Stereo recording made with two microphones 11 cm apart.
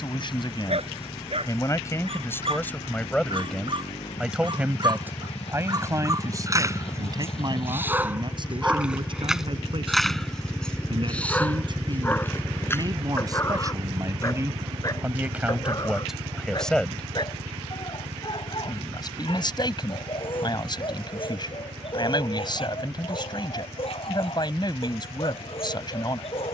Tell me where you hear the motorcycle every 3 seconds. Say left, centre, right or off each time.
left, left, left, left, right, right, right, right, right.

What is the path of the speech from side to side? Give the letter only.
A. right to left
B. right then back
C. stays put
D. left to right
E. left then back
B.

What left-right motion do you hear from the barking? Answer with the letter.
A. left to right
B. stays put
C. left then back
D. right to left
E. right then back
D.